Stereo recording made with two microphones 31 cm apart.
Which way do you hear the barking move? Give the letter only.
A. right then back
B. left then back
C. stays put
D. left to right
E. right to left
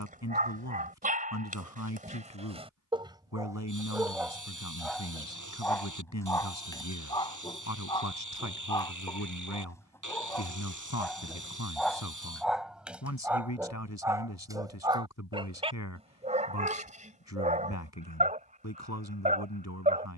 B.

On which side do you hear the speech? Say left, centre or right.
left.